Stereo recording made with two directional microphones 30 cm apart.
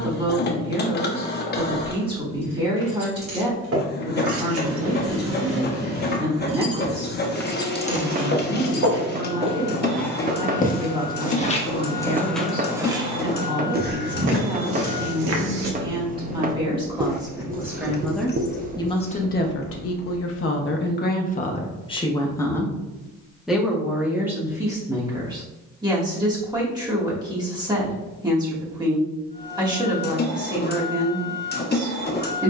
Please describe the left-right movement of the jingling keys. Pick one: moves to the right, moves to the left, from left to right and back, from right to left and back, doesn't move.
moves to the left.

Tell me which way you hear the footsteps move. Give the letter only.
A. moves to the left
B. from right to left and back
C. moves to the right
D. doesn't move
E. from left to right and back
B.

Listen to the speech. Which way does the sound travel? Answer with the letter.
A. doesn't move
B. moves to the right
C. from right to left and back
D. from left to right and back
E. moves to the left
C.